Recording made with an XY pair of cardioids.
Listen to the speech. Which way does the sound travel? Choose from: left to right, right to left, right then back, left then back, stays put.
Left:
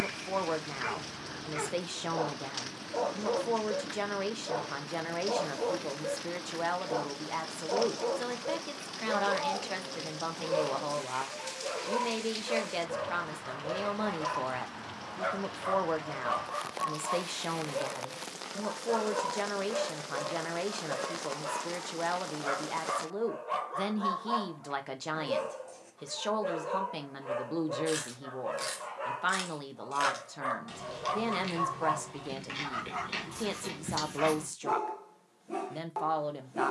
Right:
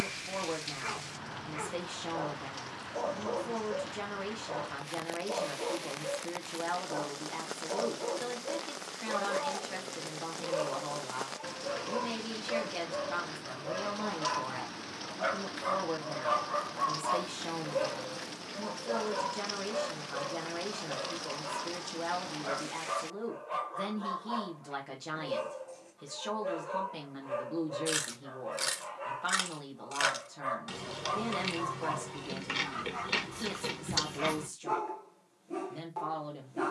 stays put.